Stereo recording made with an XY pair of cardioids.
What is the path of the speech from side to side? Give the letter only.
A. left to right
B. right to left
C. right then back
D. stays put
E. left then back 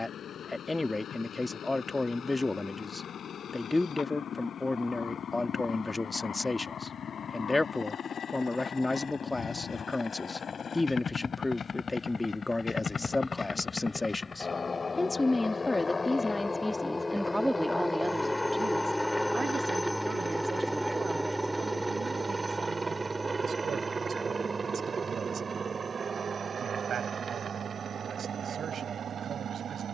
A.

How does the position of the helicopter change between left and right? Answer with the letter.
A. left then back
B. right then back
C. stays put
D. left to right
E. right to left
D.